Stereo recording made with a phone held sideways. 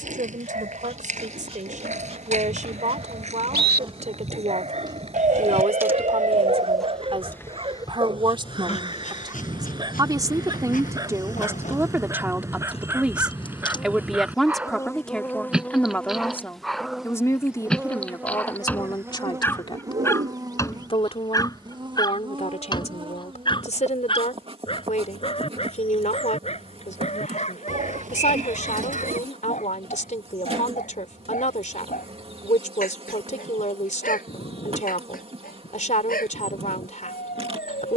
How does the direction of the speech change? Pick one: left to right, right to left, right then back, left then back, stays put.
right to left.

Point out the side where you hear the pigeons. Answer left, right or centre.
right.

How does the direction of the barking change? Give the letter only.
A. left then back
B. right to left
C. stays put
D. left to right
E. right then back
B.